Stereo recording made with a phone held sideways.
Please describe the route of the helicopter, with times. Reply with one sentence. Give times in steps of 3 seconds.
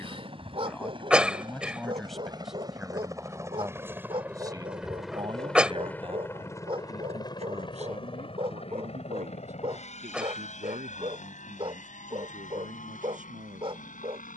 You can hear the helicopter on the right from 0 s, in the centre from 3 s and on the left from 6 s.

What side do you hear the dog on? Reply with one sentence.
You can hear the dog on the right.